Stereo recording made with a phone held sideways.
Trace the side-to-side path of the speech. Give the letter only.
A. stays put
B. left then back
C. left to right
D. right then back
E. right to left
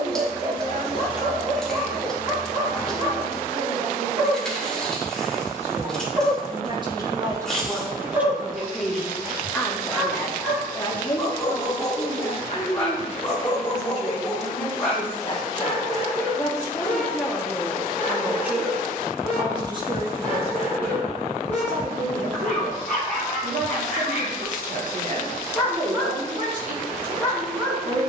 B.